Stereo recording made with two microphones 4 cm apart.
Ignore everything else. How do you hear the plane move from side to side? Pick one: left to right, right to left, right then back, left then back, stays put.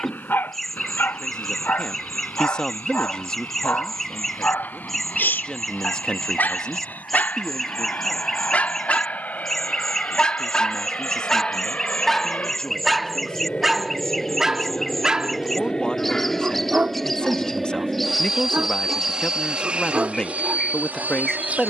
left to right.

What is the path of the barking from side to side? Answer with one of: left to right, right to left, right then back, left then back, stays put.
left to right.